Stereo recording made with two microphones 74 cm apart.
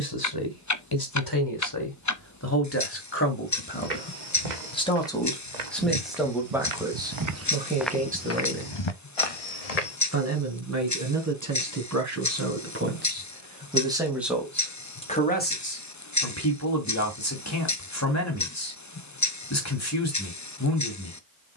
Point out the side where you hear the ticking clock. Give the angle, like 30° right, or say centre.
20° left.